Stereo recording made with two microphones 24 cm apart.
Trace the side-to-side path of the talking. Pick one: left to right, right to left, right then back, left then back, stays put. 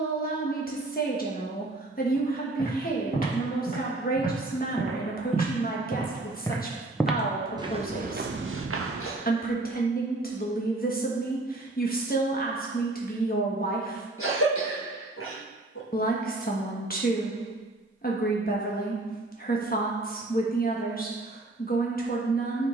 stays put.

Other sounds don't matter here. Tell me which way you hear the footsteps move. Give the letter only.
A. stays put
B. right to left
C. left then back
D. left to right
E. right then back
D.